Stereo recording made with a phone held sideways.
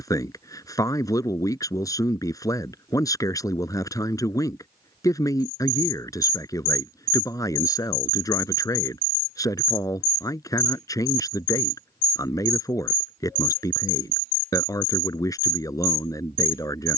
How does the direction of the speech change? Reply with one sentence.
You can hear the speech stay put.